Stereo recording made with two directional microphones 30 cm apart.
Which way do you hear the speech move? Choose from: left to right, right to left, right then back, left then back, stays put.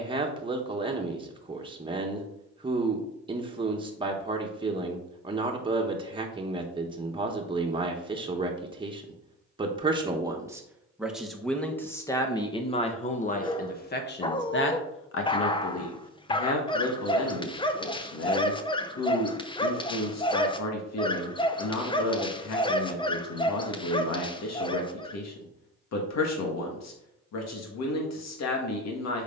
right to left.